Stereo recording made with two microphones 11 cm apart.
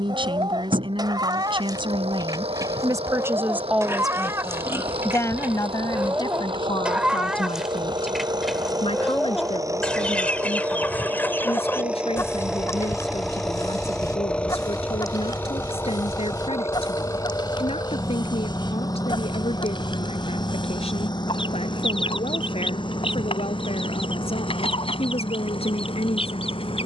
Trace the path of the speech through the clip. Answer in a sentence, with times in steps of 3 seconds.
In this clip you hear the speech on the right from 0 s, in the centre from 3 s and on the left from 6 s.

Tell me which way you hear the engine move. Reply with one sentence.
You can hear the engine travel towards the left.